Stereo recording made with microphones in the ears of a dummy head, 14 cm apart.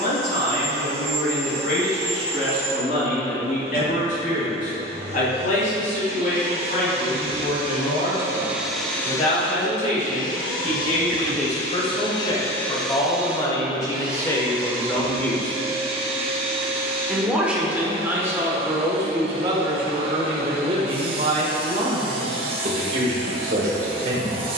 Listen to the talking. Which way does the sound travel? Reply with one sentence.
You can hear the talking go from the left side to the right.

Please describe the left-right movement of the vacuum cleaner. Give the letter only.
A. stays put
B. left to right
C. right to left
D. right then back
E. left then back
E.